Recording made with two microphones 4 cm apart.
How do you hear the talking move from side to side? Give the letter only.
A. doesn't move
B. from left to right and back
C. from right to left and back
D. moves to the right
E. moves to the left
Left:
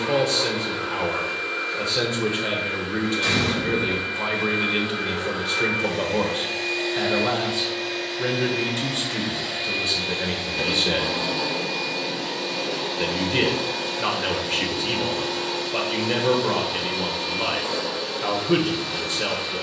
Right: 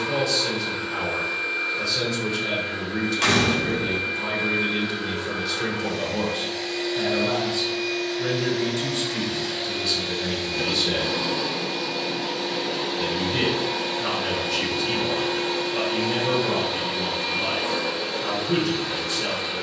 A.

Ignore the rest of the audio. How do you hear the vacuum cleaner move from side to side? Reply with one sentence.
In this clip you hear the vacuum cleaner move to the right.